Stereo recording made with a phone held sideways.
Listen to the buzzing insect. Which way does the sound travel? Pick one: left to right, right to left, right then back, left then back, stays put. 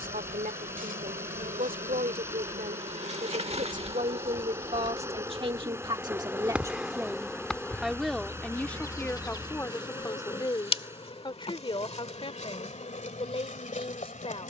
right to left.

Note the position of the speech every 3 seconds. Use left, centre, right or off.
right, right, centre, left, left.